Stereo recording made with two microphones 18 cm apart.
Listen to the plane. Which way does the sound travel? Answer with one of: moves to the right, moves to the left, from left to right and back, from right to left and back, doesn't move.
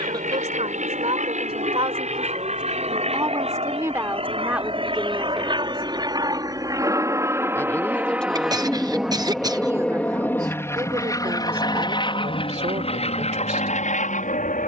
moves to the left.